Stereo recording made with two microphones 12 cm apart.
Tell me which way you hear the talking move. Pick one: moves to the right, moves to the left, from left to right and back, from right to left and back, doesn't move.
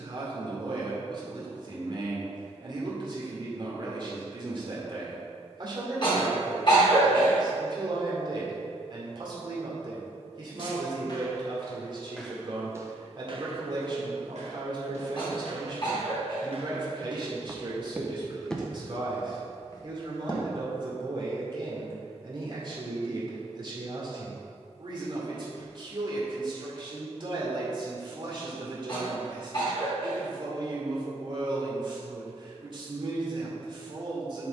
doesn't move.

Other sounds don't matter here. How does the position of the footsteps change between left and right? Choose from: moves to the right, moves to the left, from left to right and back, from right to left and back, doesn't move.
from left to right and back.